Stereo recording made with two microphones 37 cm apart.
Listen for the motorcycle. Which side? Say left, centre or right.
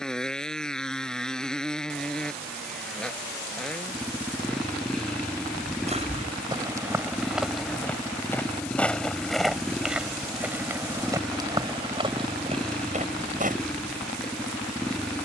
centre.